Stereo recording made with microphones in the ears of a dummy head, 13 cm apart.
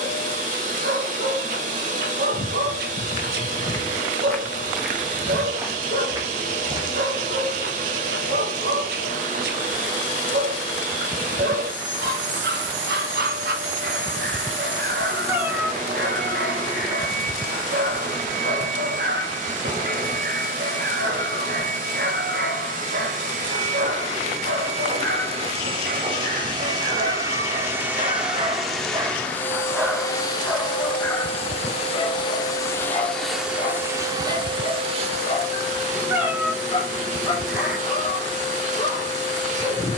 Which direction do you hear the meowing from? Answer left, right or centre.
centre.